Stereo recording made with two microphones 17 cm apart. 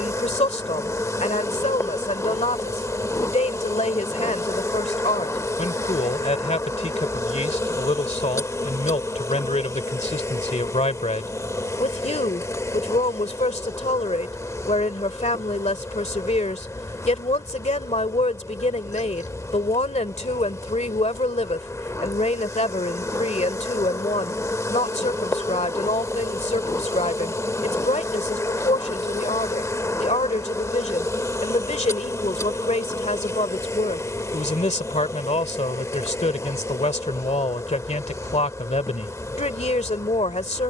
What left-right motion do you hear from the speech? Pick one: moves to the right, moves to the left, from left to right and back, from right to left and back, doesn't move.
doesn't move.